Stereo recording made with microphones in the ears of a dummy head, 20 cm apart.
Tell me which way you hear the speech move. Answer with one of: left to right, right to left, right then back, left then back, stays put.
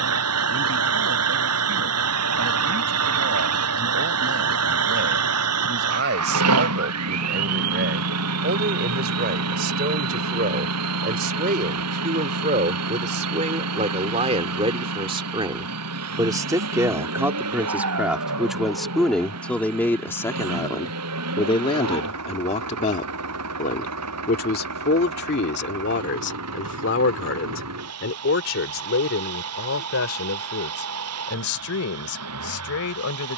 right to left.